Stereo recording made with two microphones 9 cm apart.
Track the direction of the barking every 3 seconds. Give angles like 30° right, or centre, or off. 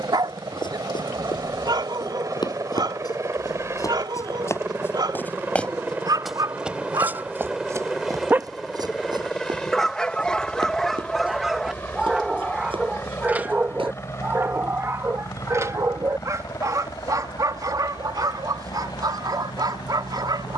50° right, 50° right, 40° right, centre, 20° right, 40° right, 50° right.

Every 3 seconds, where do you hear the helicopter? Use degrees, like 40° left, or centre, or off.
40° right, 30° right, 10° right, 10° left, 30° left, 40° left, 50° left.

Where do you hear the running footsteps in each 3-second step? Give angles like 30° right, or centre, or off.
60° left, 30° left, 30° right, 60° right, 80° right, off, off.